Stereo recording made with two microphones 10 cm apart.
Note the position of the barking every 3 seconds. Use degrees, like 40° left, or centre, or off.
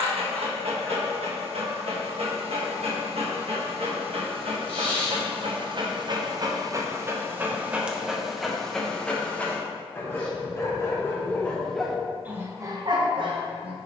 70° right, 60° right, 20° right, 20° left, 40° right.